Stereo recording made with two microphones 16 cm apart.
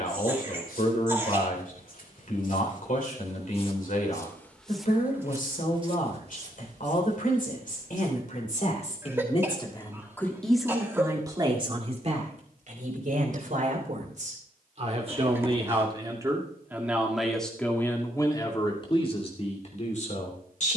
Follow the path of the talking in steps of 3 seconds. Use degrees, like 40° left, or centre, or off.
60° left, 60° left, 60° left, centre, 50° right, 10° right, 40° left.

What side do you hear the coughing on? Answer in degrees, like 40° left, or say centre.
20° right.